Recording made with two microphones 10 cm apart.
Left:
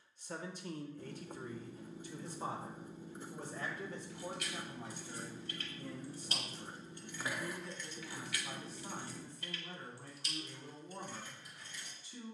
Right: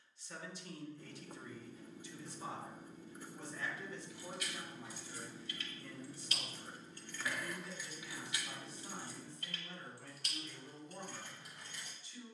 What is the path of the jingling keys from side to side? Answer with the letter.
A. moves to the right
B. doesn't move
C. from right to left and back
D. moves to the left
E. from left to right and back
A.